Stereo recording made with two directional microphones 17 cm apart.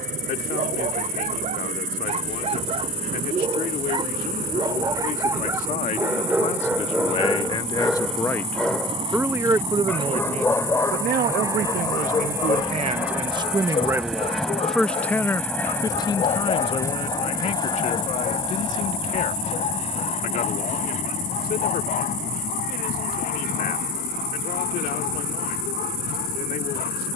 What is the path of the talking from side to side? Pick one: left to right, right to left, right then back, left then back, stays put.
right then back.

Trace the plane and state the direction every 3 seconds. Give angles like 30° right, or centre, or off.
50° right, 50° right, 40° right, 20° right, 10° right, 20° left, 30° left, 50° left, 60° left.